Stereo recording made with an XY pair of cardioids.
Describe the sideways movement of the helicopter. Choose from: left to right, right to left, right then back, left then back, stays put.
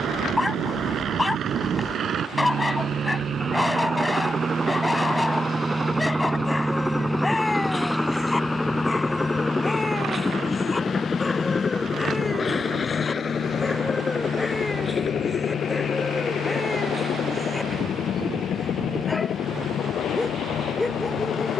right to left.